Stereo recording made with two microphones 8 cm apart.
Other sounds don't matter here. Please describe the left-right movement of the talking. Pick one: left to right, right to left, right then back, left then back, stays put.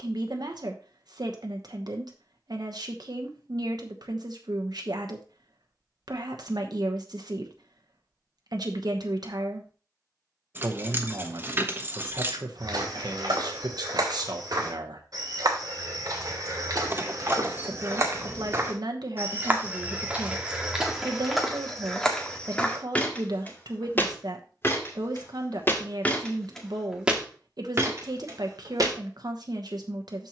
stays put.